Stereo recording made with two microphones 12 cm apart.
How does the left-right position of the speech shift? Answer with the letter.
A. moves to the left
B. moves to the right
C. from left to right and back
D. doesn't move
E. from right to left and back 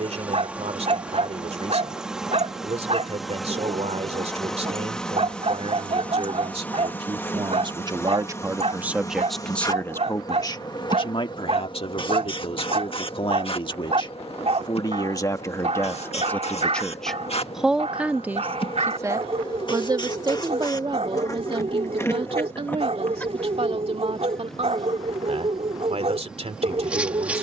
E.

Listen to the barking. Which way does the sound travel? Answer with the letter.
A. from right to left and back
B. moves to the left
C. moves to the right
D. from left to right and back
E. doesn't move
E.